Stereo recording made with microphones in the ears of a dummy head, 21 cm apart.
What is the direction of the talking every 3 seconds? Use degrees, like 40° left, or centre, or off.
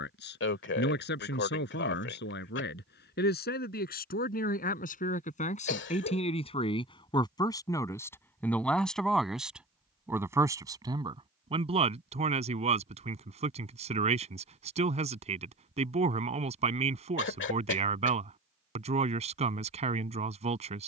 50° left, 40° left, 20° left, 10° right, 30° right, 30° right, 30° right.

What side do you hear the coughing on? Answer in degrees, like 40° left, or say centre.
50° left.